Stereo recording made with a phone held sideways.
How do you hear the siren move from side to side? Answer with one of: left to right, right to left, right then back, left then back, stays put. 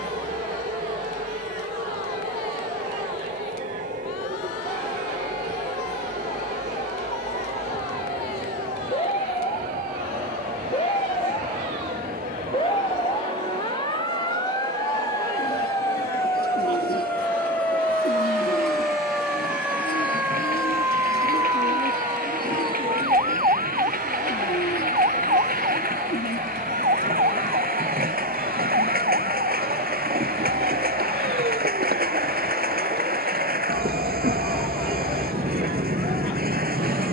left to right.